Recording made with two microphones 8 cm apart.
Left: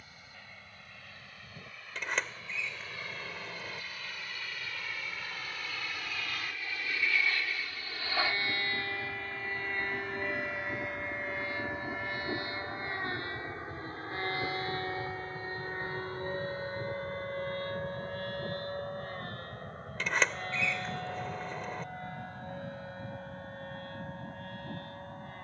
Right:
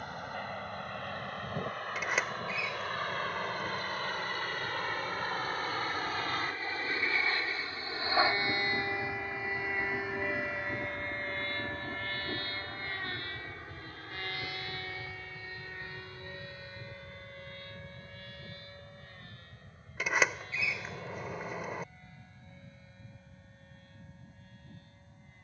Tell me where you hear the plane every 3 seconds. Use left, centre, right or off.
right, right, right, centre, left, left, left, left, left.